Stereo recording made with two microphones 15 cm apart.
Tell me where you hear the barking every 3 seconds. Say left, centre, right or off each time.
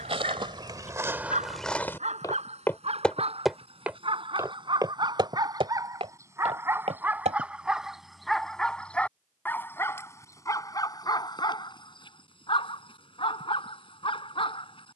right, right, centre, left, left.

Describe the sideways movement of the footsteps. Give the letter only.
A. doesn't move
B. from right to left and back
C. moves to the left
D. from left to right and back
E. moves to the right
B.